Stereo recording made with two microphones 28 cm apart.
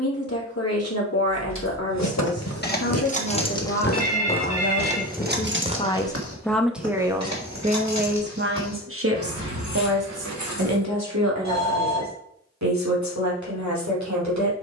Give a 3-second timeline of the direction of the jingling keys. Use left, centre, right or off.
left, centre, right, right, off.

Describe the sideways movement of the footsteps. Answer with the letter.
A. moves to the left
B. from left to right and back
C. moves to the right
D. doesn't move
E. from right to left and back
C.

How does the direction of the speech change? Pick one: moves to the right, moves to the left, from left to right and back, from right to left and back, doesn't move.
moves to the right.